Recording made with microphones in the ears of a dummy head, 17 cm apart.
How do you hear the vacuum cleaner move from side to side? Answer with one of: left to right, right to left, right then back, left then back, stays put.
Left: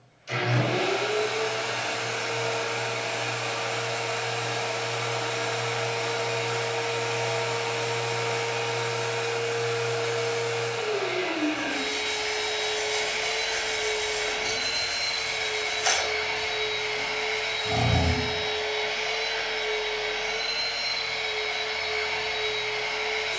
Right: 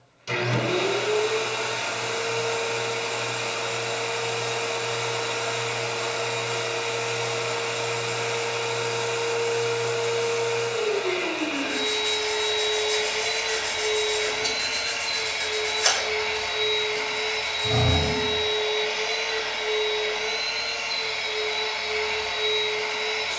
stays put.